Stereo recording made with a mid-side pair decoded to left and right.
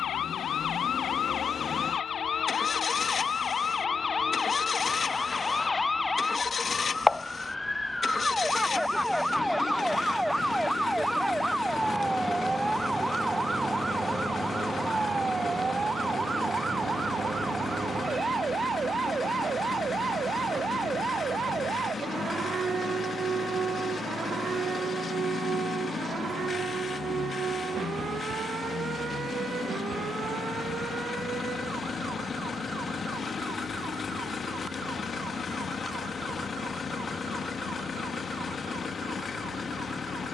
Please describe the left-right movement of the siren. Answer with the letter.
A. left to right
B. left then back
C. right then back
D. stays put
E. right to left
A.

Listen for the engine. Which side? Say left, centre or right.
left.